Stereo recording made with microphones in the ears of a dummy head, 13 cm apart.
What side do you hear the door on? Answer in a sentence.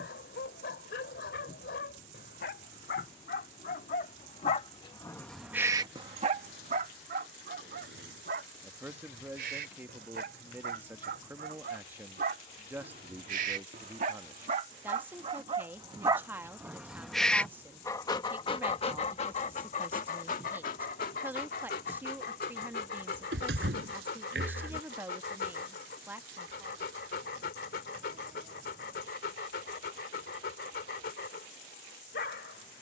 In this clip you hear the door on the right.